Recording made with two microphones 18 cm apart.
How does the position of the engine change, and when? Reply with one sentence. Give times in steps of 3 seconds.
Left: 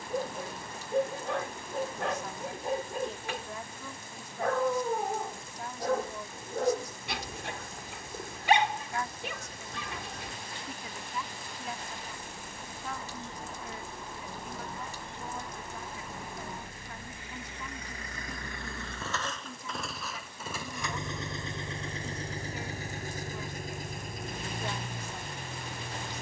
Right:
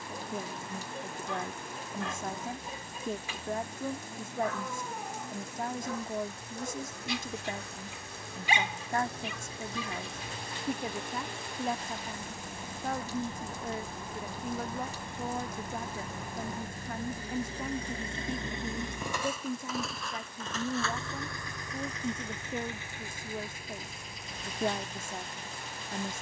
In this clip you hear the engine on the right from 0 s, in the centre from 18 s and on the left from 21 s.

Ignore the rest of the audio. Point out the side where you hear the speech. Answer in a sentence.
You can hear the speech on the right.